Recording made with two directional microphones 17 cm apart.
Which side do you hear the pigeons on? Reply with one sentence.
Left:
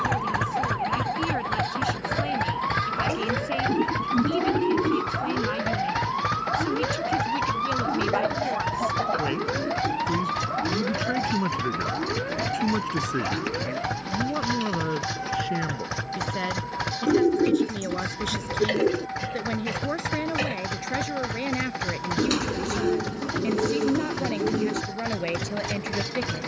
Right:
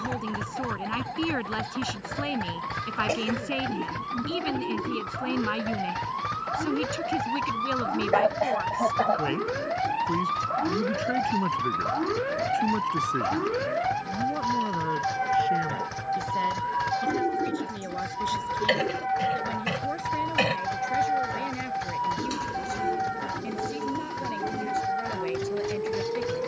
In this clip you hear the pigeons on the left.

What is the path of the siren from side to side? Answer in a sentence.
You can hear the siren move to the right.